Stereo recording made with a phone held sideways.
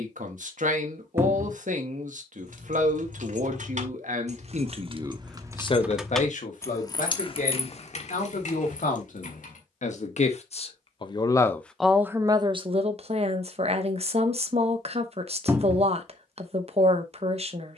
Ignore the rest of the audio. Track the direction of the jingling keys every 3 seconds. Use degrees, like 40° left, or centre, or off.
70° right, 40° right, 40° left, 60° left, off, off.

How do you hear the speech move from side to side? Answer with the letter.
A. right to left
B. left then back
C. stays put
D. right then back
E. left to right
B.